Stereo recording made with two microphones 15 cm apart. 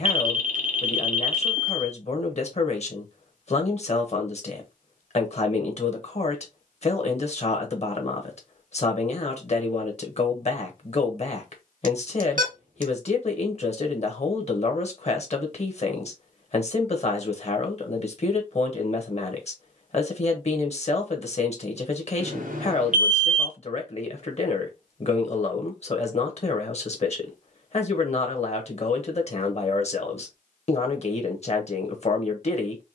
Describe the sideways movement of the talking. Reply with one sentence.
In this clip you hear the talking stay put.